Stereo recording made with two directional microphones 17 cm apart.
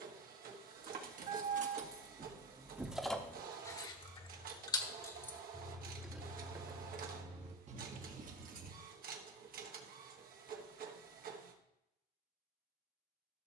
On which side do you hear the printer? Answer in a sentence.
You can hear the printer on the right.